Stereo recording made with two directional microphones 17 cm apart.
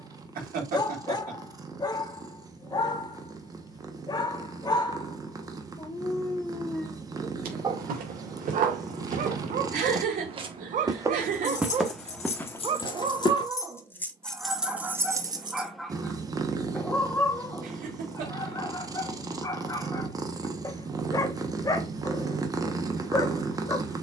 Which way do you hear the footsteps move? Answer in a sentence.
You can hear the footsteps travel towards the left.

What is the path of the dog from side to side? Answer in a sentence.
In this clip you hear the dog go right and come back.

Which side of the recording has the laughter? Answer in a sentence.
In this clip you hear the laughter on the right.